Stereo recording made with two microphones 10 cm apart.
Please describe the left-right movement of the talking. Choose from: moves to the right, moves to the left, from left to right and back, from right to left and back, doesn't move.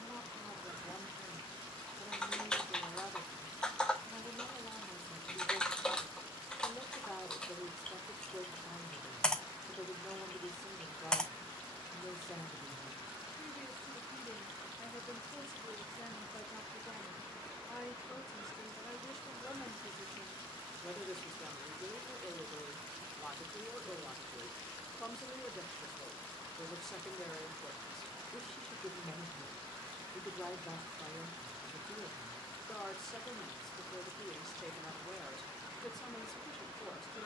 doesn't move.